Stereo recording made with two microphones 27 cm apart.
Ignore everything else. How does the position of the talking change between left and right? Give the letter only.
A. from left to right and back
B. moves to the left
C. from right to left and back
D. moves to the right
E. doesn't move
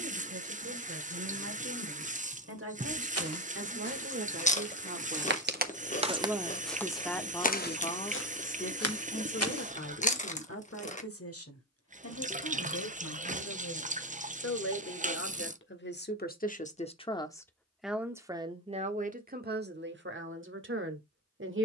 C.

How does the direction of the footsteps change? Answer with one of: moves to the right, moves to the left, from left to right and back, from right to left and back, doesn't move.
moves to the left.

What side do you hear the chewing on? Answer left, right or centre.
left.